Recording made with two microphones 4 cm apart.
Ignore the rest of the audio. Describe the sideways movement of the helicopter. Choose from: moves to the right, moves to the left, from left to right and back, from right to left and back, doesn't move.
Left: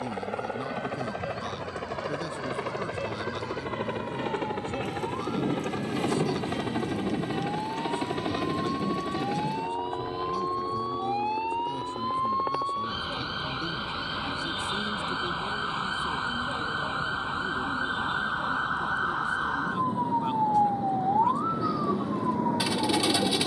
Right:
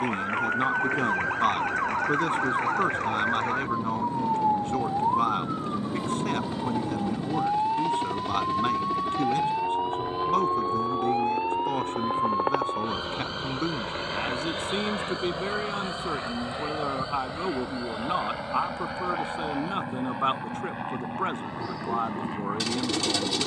moves to the right.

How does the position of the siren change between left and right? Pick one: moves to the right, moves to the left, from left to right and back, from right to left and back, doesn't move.
moves to the left.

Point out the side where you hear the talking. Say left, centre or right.
right.